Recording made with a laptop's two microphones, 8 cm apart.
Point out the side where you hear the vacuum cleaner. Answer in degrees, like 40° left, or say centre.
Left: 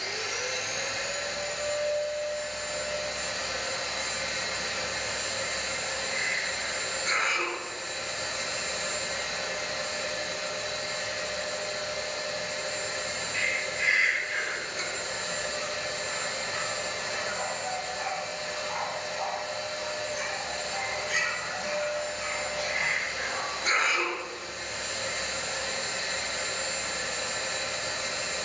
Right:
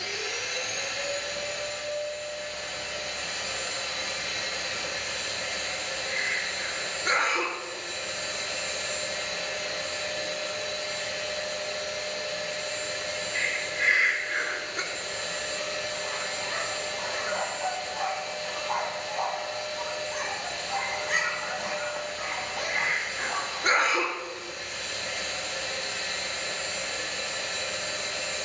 30° left.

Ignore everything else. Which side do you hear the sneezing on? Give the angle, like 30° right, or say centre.
50° right.